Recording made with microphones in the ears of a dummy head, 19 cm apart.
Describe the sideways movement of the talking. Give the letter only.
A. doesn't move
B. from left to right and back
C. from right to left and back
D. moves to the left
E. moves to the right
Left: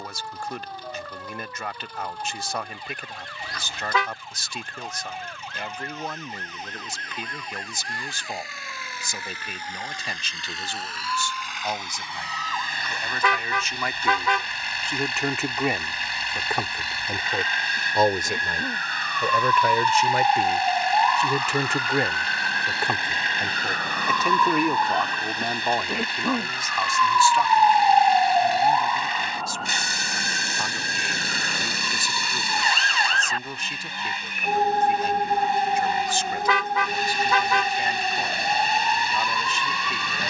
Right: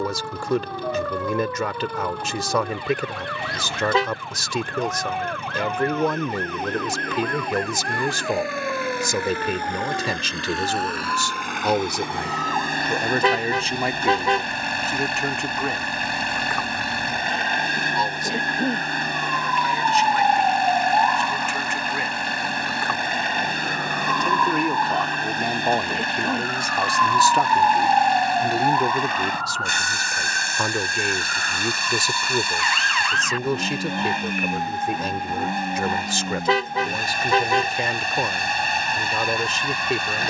C.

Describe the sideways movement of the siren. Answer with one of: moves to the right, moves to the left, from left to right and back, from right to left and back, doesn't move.
moves to the left.